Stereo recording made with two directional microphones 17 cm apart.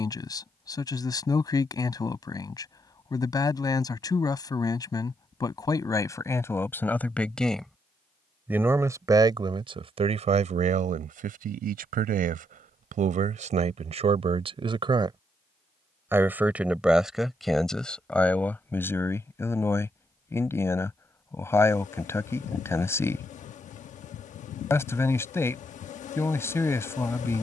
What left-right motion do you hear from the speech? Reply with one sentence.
You can hear the speech go right and come back.